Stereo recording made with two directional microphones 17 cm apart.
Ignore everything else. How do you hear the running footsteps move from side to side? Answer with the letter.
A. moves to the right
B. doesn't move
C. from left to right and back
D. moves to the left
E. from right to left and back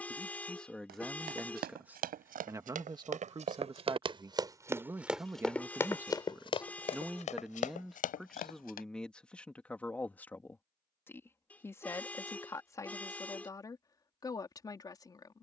D.